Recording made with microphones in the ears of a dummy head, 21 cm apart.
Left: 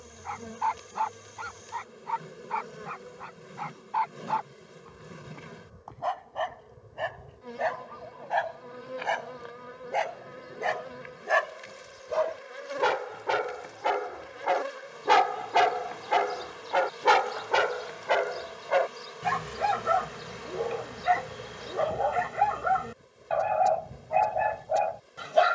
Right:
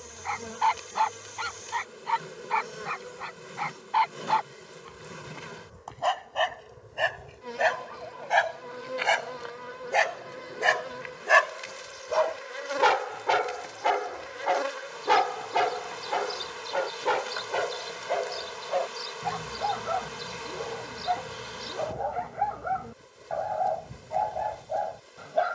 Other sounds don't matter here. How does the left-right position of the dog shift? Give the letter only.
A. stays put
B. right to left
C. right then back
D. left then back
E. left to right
B.